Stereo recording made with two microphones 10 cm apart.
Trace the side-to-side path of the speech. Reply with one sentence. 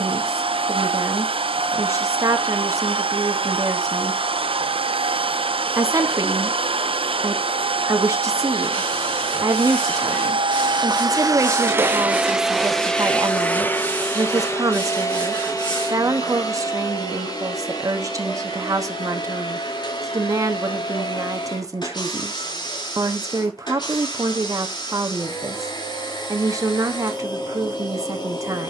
In this clip you hear the speech stay put.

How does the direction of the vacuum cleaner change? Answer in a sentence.
In this clip you hear the vacuum cleaner move to the left.